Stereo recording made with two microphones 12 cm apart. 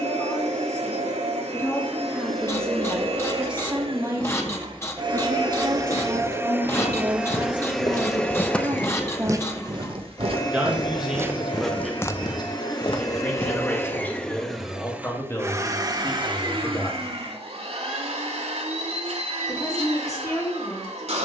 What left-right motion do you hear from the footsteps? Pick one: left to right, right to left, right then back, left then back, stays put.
right then back.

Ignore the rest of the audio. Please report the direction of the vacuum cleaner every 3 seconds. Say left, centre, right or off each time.
right, right, centre, left, left, right, right.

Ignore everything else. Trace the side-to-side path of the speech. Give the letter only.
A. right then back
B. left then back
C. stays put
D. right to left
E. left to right
A.